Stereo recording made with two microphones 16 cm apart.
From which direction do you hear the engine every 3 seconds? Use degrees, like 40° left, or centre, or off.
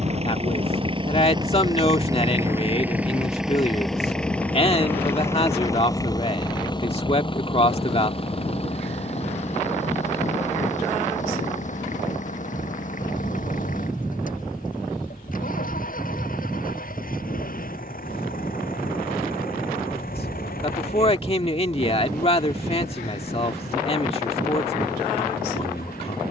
30° right, 10° left, 30° left, 40° left, 50° left, 60° left, 60° left, 60° left, 60° left.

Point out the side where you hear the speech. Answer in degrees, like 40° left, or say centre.
40° left.